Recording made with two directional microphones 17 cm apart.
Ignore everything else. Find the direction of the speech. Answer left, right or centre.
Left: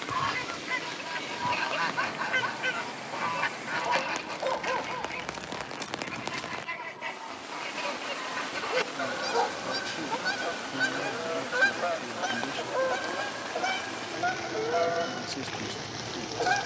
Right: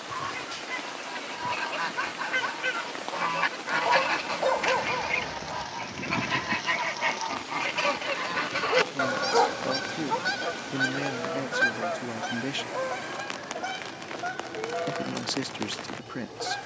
right.